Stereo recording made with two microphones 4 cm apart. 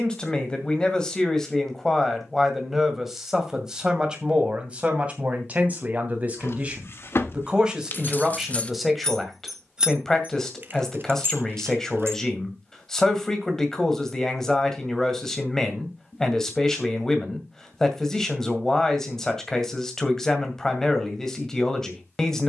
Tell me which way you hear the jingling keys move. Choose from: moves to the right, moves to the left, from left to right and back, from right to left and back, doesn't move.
moves to the right.